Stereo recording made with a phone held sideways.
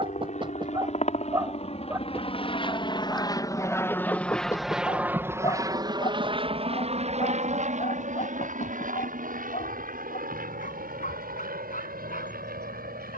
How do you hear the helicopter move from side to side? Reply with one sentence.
In this clip you hear the helicopter move to the right.